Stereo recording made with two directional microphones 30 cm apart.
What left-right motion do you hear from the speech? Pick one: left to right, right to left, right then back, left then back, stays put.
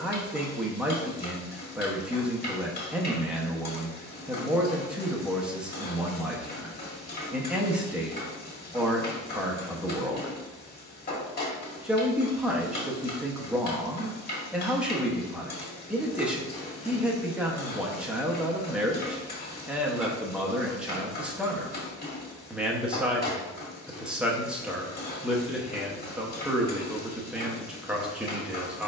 stays put.